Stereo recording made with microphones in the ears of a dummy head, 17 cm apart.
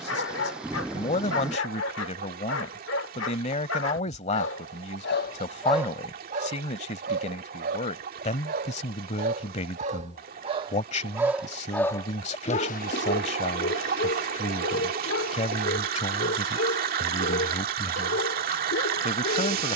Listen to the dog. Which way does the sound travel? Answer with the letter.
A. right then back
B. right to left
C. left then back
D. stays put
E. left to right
A.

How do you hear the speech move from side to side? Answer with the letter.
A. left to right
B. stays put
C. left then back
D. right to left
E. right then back
B.